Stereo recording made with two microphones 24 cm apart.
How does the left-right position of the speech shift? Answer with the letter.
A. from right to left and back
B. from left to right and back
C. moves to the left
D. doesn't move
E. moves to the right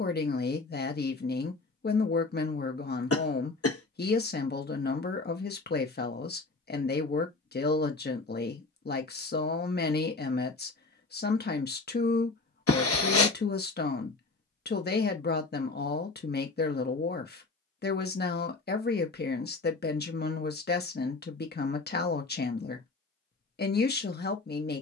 D.